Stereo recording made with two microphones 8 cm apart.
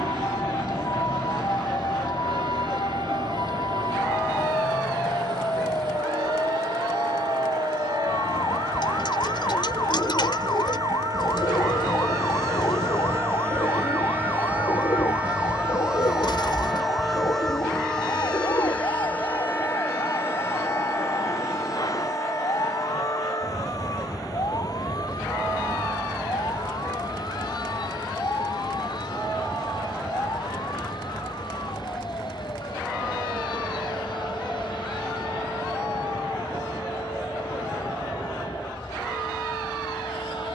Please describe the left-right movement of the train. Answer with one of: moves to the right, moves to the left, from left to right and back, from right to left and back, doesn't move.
moves to the left.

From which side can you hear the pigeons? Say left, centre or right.
left.